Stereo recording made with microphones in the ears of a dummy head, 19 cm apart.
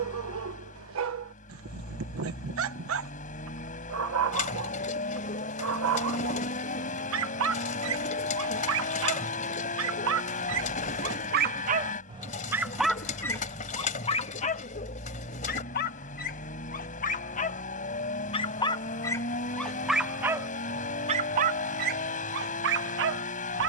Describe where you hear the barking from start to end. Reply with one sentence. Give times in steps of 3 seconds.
You can hear the barking on the right from 0 s, in the centre from 12 s, on the left from 15 s, in the centre from 18 s and on the right from 21 s.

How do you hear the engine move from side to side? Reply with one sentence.
In this clip you hear the engine stay put.